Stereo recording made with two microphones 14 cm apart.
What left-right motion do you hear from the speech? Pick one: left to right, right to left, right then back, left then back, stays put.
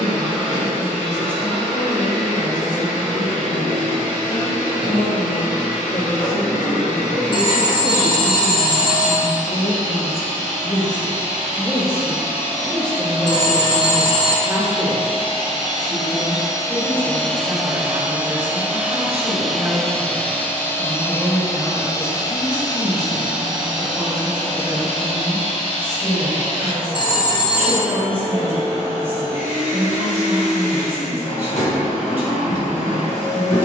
left to right.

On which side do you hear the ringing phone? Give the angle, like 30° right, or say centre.
30° left.